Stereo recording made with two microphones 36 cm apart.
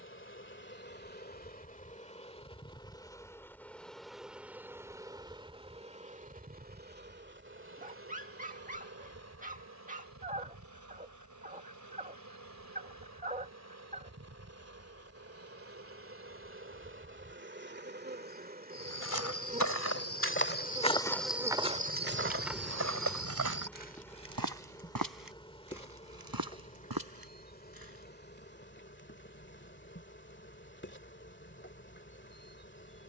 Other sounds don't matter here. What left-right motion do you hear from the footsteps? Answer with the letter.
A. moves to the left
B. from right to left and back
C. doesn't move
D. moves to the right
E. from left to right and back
D.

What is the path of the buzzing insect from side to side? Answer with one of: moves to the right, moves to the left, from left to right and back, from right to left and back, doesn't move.
from left to right and back.